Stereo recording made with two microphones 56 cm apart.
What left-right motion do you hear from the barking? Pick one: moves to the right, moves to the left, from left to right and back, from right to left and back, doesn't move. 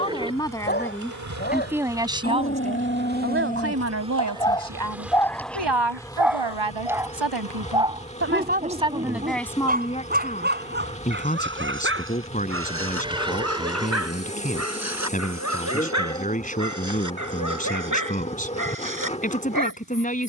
moves to the right.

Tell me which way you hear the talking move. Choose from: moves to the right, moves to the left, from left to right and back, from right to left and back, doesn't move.
from left to right and back.